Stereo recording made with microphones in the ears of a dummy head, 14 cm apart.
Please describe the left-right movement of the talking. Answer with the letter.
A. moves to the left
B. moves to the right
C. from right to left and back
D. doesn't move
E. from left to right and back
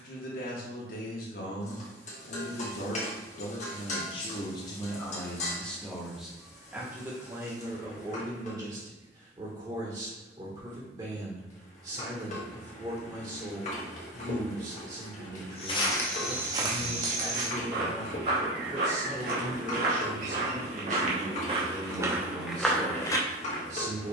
B.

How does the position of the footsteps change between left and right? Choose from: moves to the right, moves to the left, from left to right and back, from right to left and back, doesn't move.
from left to right and back.